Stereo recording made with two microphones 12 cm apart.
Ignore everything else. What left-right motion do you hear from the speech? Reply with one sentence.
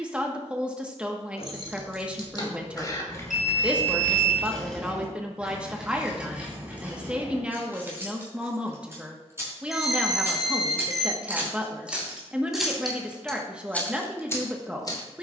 You can hear the speech stay in one place.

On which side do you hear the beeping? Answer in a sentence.
In this clip you hear the beeping in the centre.